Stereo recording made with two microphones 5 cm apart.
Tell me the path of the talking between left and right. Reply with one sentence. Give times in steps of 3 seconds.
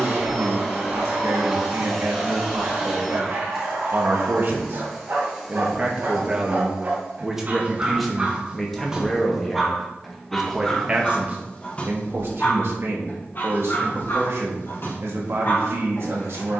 You can hear the talking on the right from 0 s, in the centre from 6 s and on the right from 12 s.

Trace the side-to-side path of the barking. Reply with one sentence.
In this clip you hear the barking move to the left.